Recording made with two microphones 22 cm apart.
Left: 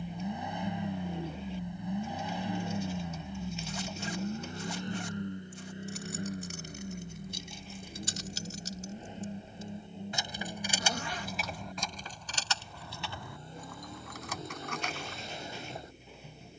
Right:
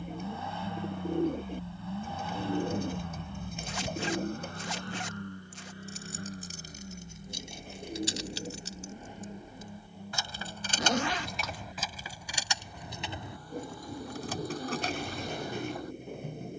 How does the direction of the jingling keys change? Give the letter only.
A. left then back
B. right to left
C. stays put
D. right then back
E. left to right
E.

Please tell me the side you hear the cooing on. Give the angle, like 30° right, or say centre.
50° right.